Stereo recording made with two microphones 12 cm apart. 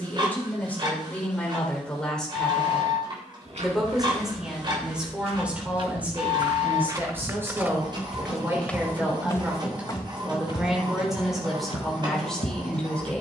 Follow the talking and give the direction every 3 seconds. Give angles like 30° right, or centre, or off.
10° left, 10° right, 20° right, 10° right, 10° left.